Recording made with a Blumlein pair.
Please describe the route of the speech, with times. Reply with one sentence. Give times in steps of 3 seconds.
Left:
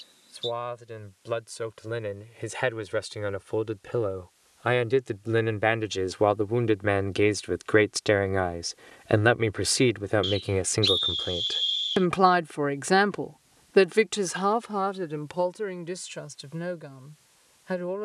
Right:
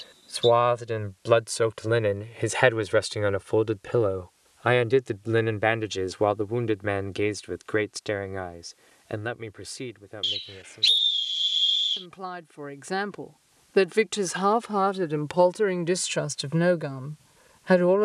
You can hear the speech on the right from 0 s, in the centre from 3 s, on the left from 9 s, in the centre from 12 s and on the right from 15 s.